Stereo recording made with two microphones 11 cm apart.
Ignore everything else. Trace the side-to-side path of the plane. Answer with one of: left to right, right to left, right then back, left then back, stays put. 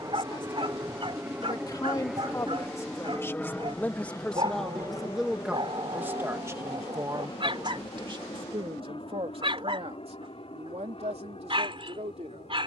right to left.